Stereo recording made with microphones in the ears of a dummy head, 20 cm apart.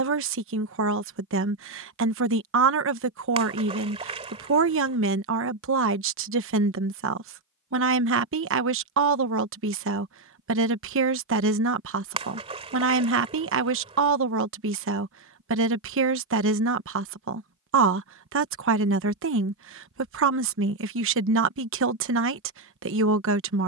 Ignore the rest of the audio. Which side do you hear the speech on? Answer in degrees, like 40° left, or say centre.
60° right.